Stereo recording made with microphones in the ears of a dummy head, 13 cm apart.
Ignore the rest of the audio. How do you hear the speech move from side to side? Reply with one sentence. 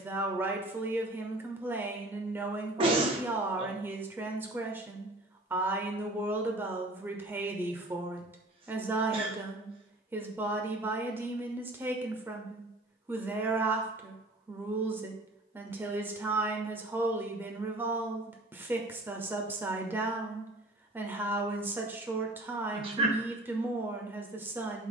In this clip you hear the speech stay put.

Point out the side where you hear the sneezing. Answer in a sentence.
You can hear the sneezing on the right.